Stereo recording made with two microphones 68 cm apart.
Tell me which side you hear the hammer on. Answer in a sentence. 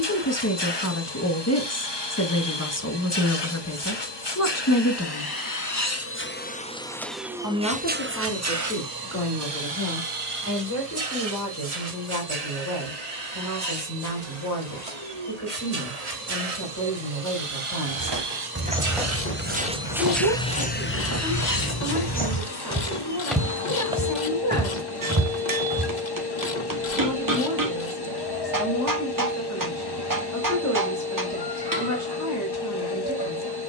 In this clip you hear the hammer on the right.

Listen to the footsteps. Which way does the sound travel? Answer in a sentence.
In this clip you hear the footsteps move from right to left and back again.